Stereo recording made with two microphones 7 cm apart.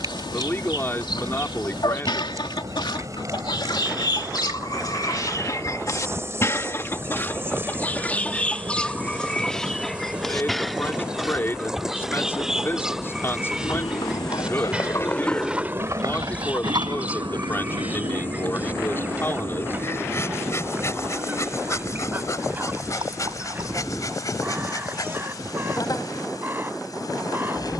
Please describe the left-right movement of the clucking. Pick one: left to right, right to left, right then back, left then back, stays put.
left to right.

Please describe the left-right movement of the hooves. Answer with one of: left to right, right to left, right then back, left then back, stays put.
left to right.